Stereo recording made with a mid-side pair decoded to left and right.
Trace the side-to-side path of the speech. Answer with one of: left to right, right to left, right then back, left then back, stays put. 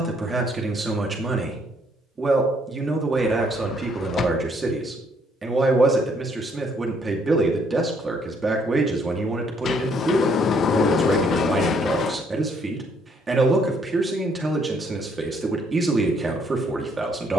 stays put.